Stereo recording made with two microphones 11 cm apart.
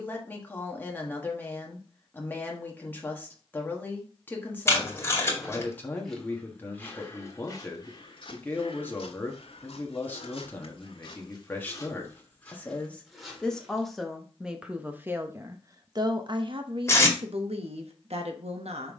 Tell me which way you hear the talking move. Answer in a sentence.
You can hear the talking move to the right.